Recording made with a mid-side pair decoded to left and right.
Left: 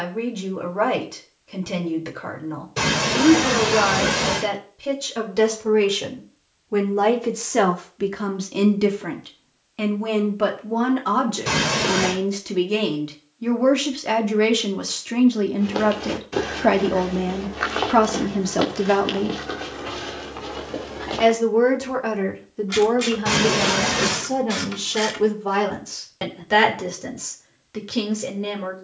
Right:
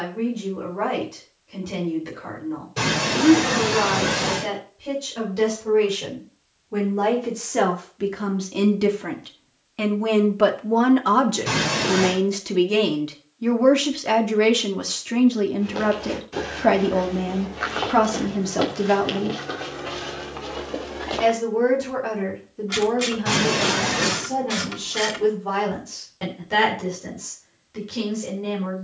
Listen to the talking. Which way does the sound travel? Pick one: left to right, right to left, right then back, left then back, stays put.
right then back.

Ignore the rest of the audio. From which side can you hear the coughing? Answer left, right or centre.
left.